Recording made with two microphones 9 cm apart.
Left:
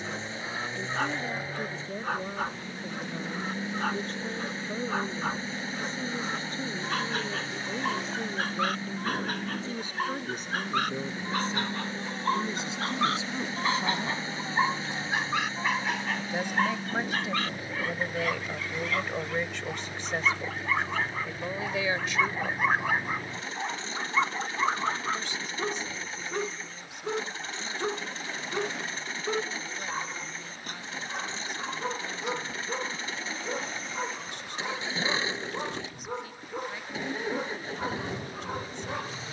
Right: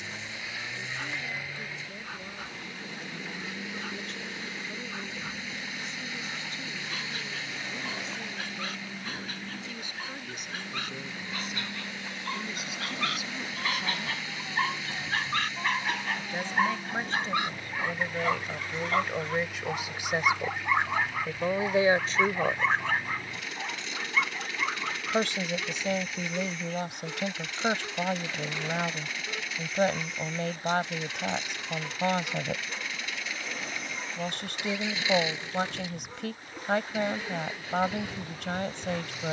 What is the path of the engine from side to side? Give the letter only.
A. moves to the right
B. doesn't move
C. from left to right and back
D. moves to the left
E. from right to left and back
B.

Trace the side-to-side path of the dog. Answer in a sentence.
You can hear the dog move from left to right and back again.